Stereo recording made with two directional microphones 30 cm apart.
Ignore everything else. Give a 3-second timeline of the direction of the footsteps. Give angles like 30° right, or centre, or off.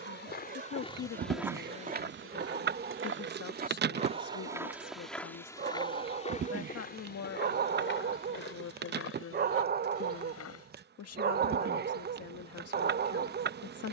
10° right, 10° right, 30° left, 50° left, off.